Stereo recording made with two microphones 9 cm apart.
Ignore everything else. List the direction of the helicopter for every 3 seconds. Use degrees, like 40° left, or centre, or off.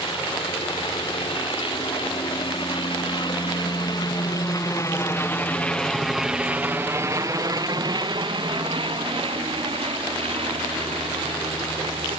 70° left, 40° left, 40° right, 70° right.